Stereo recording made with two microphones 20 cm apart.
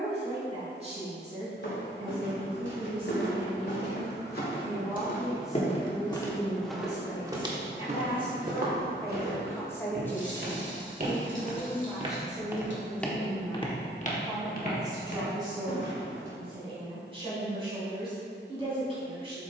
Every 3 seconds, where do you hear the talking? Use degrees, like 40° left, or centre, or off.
30° right, 10° right, 20° left, 10° left, 10° right, 20° right, 30° right.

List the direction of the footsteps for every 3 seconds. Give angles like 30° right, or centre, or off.
70° left, 50° left, 20° right, 50° right, 20° left, 60° left, off.